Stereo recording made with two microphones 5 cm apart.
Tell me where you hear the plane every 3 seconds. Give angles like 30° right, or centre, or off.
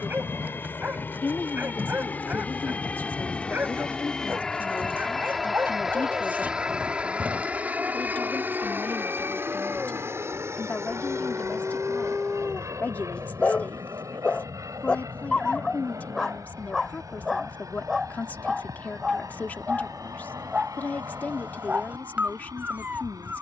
40° left, 10° left, 20° right, 50° right, 60° right, 70° right, 80° right, 80° right.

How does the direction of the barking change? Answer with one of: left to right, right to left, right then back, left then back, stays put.
left then back.